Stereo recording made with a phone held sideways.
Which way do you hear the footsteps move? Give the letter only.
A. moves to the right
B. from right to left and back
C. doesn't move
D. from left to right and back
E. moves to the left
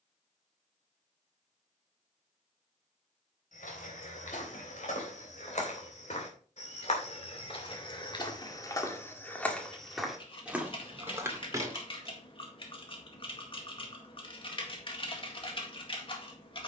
A.